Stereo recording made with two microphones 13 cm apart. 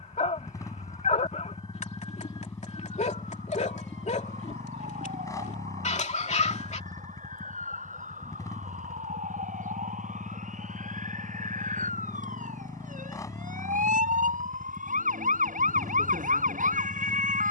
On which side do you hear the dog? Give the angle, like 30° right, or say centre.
60° left.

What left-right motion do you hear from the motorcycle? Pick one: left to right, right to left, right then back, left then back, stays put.
stays put.